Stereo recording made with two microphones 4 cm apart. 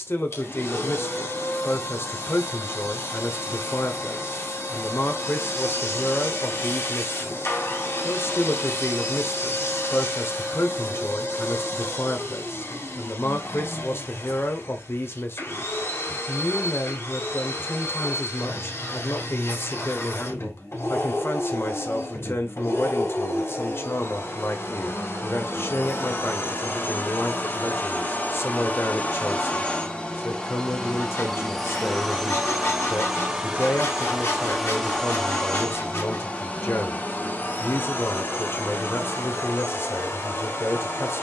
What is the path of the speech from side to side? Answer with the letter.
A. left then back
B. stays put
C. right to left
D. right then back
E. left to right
B.